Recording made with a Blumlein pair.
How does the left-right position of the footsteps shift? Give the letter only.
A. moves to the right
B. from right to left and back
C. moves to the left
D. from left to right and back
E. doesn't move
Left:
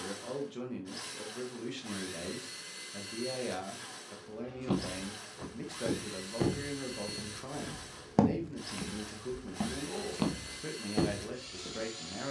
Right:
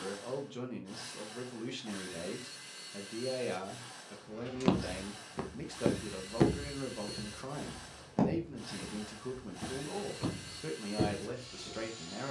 C.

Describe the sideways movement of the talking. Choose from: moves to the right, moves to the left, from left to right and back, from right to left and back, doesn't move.
doesn't move.